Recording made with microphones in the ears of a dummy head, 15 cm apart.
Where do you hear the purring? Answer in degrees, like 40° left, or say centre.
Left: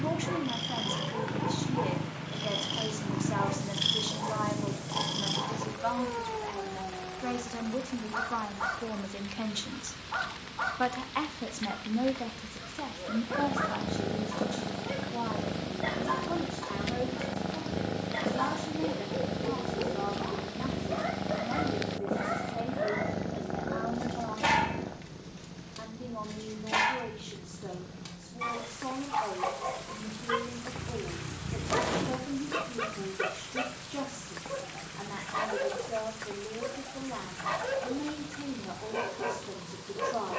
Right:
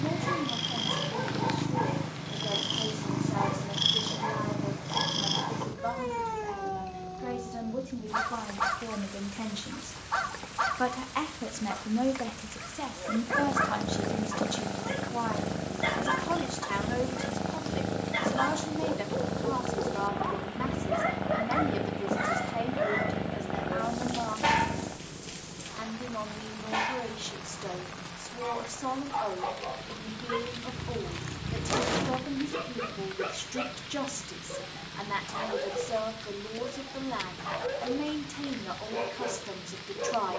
10° right.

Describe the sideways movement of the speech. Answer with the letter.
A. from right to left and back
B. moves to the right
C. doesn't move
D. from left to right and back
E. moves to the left
B.